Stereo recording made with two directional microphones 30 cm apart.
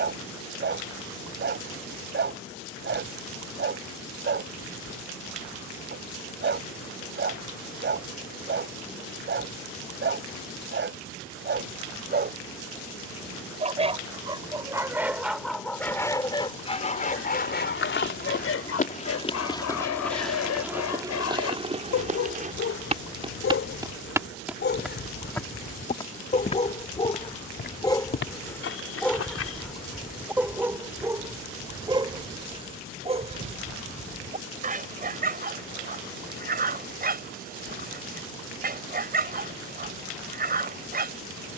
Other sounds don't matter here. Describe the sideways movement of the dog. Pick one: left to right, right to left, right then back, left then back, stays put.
left then back.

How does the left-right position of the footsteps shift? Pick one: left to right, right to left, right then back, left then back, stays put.
right then back.